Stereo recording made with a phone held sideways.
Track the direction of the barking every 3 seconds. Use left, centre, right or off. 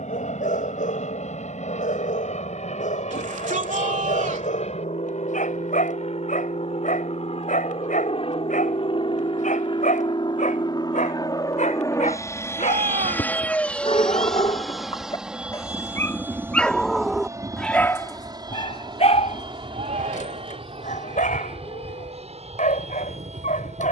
left, left, left, left, left, centre, left, left.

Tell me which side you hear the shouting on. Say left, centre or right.
right.